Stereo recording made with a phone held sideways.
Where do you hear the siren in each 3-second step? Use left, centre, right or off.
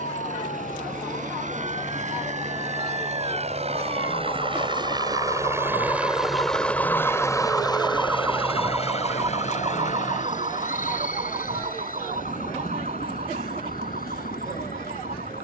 left, left, centre, right, right.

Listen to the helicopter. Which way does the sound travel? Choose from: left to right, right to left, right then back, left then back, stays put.
right to left.